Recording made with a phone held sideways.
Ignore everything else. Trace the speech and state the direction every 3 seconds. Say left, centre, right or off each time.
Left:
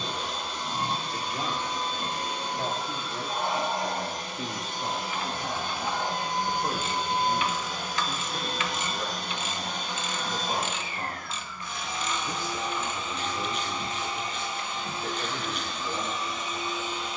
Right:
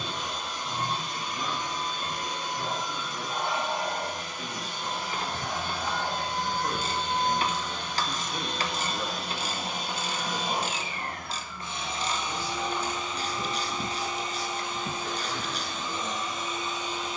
left, left, centre, centre, left, left.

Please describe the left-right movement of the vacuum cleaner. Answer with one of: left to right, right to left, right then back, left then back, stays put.
left to right.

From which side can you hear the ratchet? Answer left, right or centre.
right.